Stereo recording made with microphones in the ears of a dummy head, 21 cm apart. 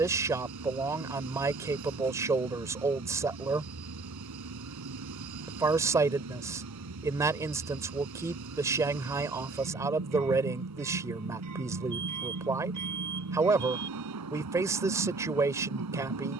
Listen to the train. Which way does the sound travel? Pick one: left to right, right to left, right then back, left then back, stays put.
stays put.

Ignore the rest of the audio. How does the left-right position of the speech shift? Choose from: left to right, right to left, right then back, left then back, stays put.
stays put.